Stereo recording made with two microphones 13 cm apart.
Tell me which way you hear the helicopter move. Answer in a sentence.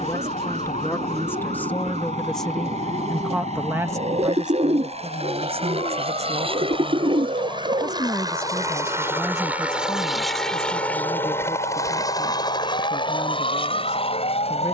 You can hear the helicopter move from right to left.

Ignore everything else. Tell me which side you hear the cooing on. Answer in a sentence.
In this clip you hear the cooing on the right.